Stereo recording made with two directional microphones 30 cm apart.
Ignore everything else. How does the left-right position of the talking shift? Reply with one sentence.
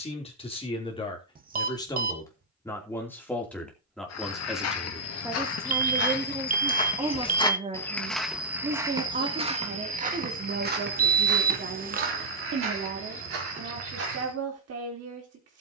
In this clip you hear the talking travel towards the right.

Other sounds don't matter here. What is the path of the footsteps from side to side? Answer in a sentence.
You can hear the footsteps travel towards the right.